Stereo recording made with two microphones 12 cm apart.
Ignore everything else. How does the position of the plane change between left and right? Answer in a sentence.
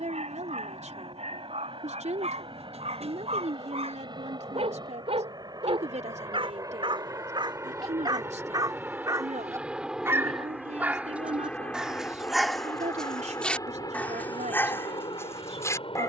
In this clip you hear the plane go from the right side to the left.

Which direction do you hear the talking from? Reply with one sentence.
You can hear the talking on the right.